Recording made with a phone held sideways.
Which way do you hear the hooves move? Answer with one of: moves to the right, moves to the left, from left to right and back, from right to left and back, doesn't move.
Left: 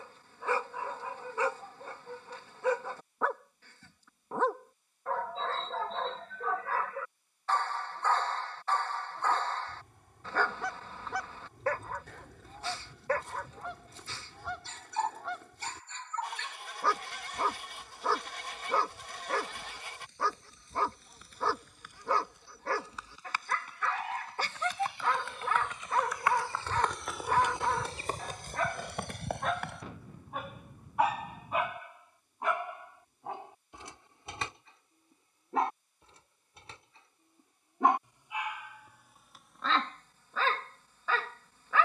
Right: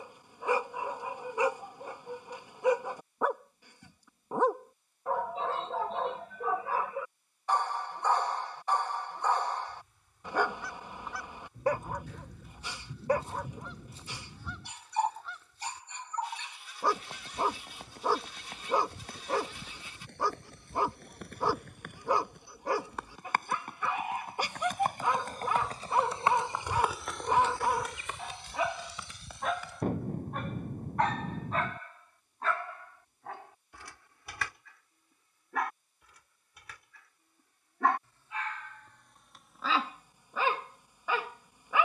moves to the left.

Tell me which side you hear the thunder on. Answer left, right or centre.
right.